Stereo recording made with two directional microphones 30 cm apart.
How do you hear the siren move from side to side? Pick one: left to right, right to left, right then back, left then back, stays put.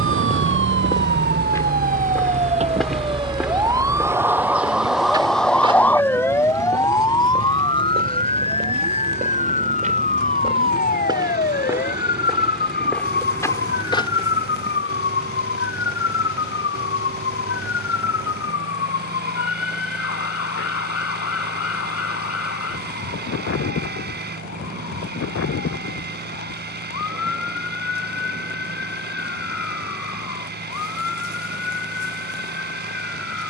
right to left.